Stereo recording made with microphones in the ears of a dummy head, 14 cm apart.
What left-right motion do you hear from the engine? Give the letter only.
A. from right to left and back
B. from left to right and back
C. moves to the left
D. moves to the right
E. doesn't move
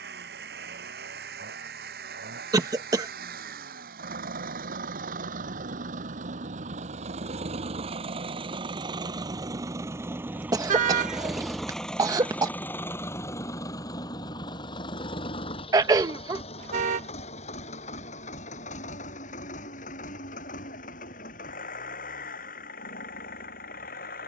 C.